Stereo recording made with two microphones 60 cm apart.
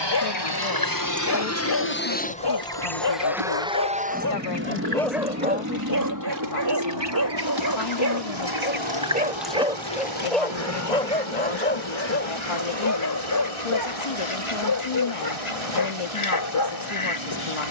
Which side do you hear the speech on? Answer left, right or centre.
left.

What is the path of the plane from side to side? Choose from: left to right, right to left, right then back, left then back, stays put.
left to right.